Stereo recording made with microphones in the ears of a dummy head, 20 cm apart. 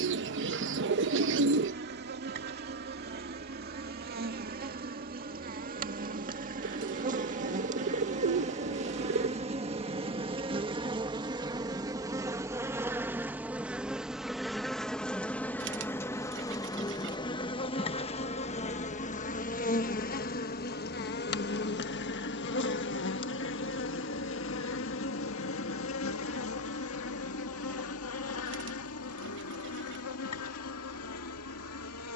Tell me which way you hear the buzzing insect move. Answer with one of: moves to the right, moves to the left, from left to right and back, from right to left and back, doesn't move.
moves to the left.